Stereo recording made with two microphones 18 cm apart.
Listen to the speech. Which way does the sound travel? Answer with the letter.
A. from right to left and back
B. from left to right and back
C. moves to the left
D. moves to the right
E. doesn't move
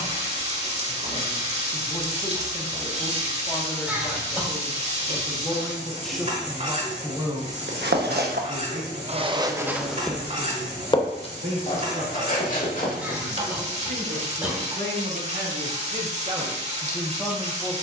B.